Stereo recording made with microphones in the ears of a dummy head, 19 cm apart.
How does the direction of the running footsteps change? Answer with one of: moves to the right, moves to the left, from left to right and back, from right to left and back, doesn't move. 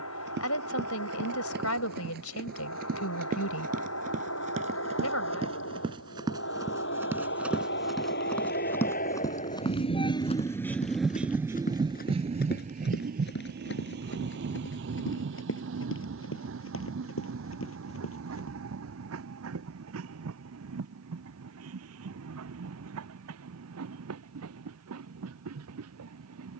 moves to the left.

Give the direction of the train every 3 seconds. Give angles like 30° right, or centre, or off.
80° left, 70° left, 60° left, 10° left, 50° right, 70° right, 70° right, 80° right, 80° right.